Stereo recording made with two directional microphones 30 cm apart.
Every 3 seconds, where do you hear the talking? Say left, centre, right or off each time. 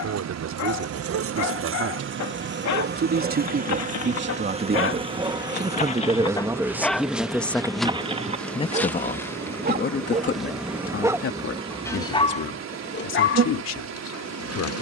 right, right, centre, left, left.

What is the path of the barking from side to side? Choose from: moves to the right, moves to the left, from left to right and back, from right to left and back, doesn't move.
from left to right and back.